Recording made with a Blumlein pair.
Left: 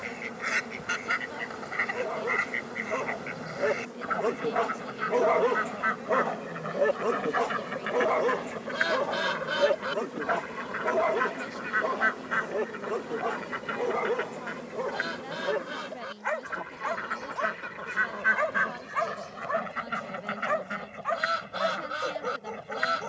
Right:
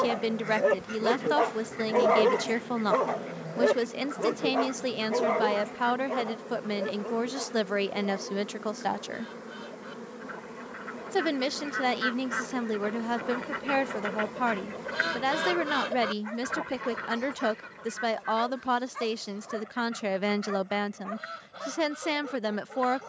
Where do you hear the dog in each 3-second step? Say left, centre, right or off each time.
right, centre, left, left, left, left, left, left.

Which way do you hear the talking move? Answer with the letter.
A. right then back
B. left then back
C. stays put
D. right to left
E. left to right
C.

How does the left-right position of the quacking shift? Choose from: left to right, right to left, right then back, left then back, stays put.
right then back.